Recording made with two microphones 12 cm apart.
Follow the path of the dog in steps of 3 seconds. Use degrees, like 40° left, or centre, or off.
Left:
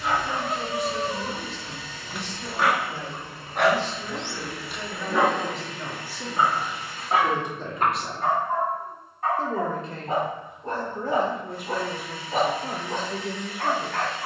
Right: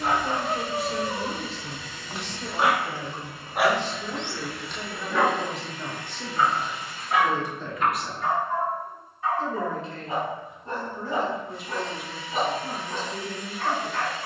30° right, centre, 40° left, 60° left, 60° left.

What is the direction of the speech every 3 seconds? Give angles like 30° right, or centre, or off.
30° right, 10° right, 20° left, 50° left, 50° left.